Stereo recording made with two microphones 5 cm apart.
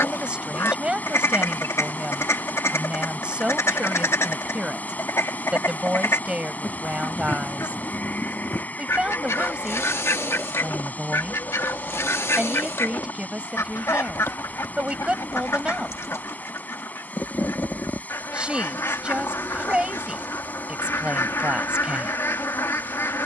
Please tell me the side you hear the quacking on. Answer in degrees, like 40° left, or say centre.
80° left.